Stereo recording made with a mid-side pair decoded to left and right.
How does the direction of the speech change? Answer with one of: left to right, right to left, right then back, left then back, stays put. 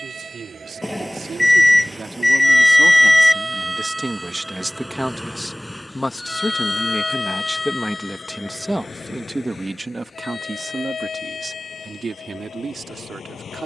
left then back.